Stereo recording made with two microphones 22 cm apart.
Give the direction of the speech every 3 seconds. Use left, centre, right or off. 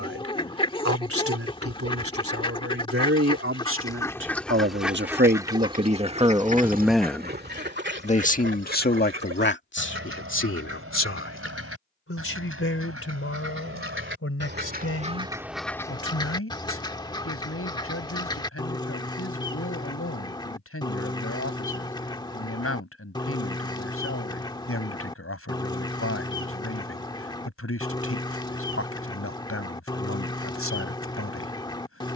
right, right, centre, left, left, left, left, left, left, left, left.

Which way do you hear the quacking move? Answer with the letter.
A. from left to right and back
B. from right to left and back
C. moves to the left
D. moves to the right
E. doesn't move
A.